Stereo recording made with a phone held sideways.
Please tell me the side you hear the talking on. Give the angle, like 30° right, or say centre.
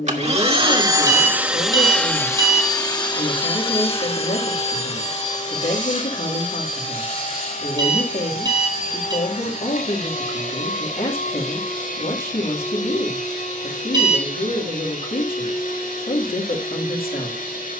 70° left.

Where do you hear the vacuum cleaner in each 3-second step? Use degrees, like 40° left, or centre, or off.
10° right, 40° left, 60° left, 60° left, 60° left, 70° left.